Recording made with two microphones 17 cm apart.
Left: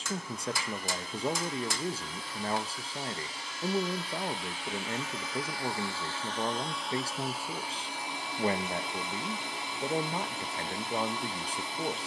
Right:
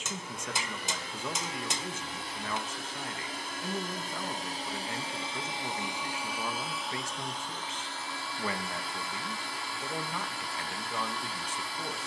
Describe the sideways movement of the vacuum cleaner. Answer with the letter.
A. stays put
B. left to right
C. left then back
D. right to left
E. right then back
D.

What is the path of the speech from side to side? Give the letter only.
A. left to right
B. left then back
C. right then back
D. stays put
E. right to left
D.